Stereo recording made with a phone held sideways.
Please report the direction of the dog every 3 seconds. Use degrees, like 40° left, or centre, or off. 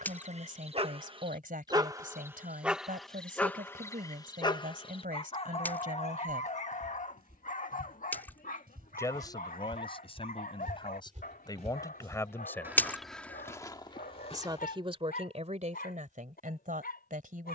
30° right, 30° left, 60° left, 70° left, 70° left, 80° left.